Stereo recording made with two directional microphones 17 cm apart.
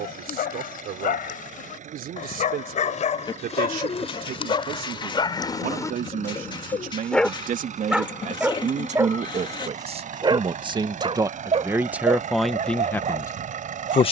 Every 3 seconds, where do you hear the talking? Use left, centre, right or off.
right, right, right, right, centre.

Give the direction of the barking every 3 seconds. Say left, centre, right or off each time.
left, left, centre, right, right.